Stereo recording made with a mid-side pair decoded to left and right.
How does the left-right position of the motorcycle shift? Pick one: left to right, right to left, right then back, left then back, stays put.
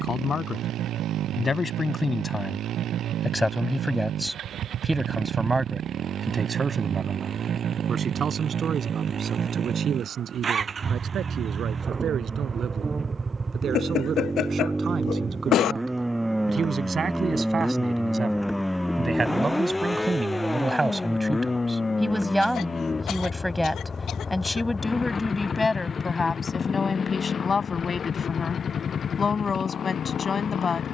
right to left.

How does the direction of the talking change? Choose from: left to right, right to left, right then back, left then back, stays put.
right then back.